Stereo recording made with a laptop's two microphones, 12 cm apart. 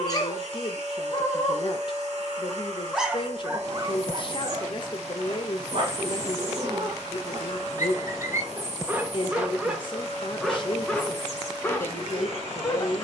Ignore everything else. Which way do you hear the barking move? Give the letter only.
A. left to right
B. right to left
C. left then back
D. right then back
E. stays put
D.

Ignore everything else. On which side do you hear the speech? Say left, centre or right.
left.